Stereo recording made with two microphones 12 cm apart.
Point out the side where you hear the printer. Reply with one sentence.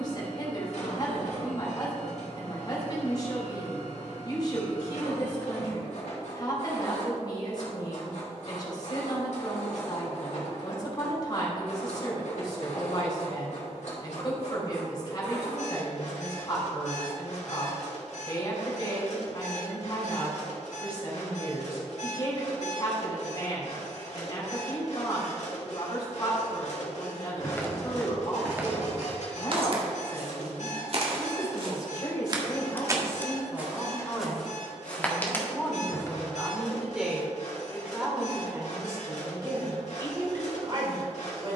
In this clip you hear the printer on the left.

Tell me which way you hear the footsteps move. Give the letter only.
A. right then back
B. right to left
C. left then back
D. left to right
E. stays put
A.